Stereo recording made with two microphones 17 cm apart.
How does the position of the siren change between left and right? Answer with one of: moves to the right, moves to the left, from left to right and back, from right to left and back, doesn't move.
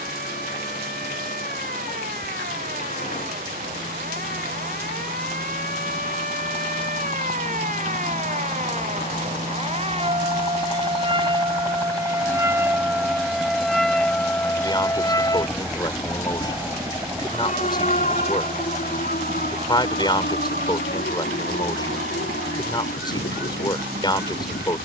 moves to the left.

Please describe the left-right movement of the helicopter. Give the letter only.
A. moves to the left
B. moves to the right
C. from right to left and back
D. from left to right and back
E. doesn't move
B.